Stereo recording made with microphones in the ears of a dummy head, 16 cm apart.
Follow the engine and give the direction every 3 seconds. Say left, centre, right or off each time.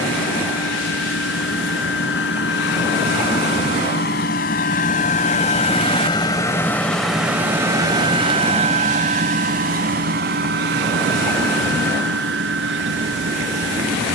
left, left, centre, right, right.